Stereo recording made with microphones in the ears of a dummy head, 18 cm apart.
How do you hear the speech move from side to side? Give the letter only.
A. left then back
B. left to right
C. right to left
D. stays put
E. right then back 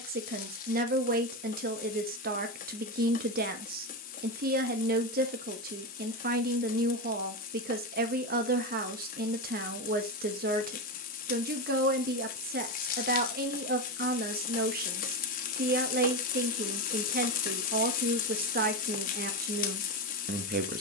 D.